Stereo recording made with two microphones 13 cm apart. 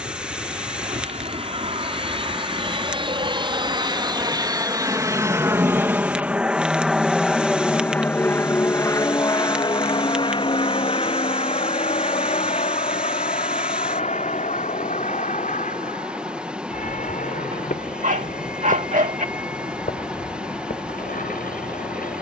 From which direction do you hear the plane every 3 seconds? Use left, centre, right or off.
right, right, centre, left, left, left, left, left.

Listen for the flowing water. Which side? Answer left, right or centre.
centre.